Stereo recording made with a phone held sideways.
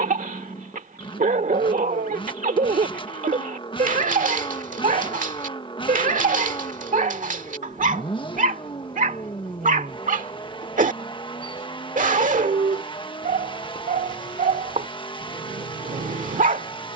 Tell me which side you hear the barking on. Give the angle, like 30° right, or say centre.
70° right.